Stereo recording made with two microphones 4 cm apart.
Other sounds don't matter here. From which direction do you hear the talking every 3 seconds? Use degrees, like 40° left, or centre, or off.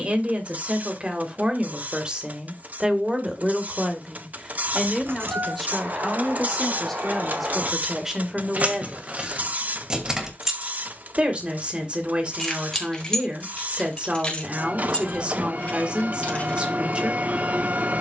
30° right, 10° right, 10° right, 30° right, 30° right, 30° right.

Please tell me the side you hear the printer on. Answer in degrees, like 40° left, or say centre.
50° right.